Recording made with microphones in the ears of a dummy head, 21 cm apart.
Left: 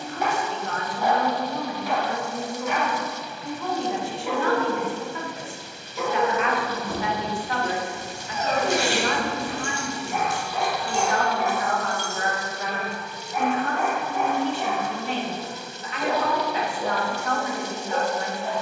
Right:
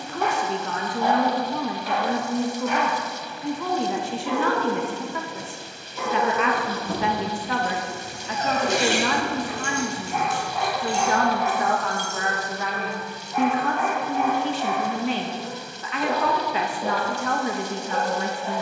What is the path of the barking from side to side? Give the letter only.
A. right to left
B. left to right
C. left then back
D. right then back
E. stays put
E.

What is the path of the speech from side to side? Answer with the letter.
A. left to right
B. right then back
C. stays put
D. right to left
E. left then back
C.